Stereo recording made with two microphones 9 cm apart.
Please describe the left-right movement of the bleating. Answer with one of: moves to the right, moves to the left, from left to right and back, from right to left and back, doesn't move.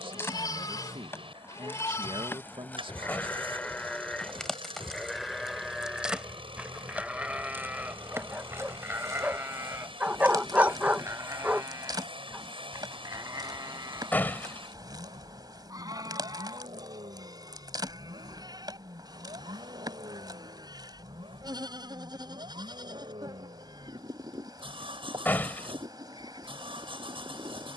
moves to the right.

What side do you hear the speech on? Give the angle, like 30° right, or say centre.
70° right.